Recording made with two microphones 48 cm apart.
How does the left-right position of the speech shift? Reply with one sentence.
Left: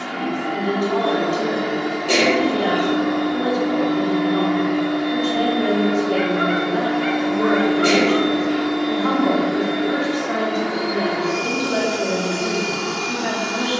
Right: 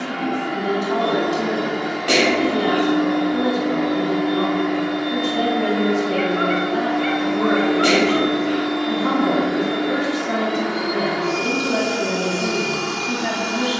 You can hear the speech stay in one place.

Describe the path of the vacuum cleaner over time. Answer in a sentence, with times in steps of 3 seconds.
In this clip you hear the vacuum cleaner in the centre from 0 s and on the right from 6 s.